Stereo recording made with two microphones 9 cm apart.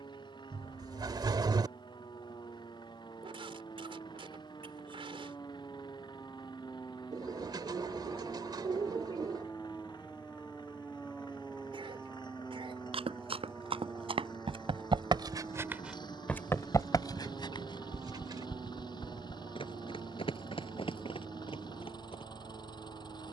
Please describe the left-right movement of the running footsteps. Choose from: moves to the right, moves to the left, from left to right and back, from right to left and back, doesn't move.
moves to the left.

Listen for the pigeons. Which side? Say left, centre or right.
right.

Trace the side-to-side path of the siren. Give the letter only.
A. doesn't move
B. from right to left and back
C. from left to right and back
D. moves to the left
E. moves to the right
E.